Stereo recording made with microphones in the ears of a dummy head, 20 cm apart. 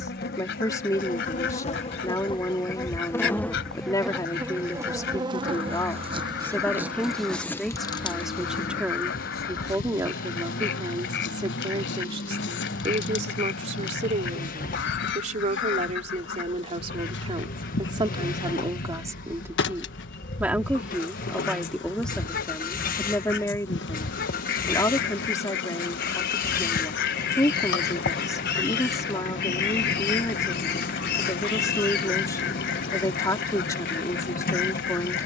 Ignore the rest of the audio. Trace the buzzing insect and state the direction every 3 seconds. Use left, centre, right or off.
left, centre, centre, left, left, left, left, left, left, left, left, left.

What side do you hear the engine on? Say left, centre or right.
left.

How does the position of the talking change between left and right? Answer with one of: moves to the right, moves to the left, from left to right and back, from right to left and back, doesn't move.
from left to right and back.